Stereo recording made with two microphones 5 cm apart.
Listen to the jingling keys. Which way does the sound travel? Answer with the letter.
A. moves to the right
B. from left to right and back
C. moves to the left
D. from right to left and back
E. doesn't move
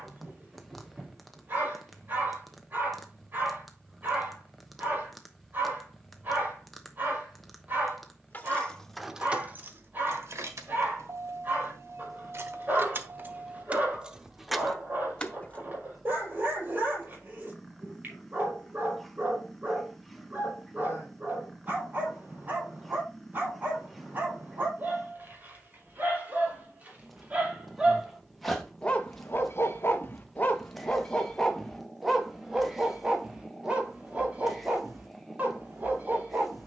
B.